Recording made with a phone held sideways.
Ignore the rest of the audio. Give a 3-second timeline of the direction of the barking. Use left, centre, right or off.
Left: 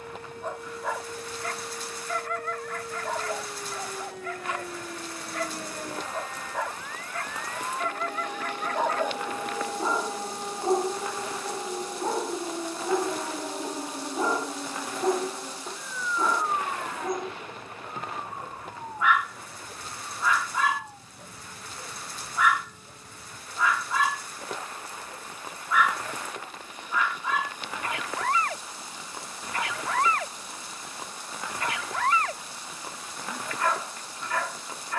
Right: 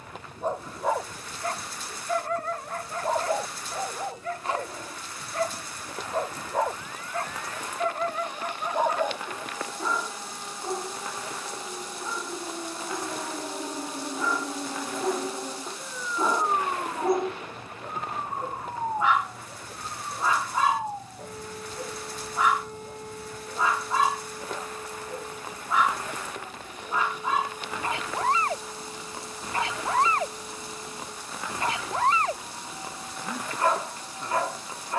right, right, right, left, left, centre, right, right, right, right, right, right.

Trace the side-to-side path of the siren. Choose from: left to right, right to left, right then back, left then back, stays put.
left to right.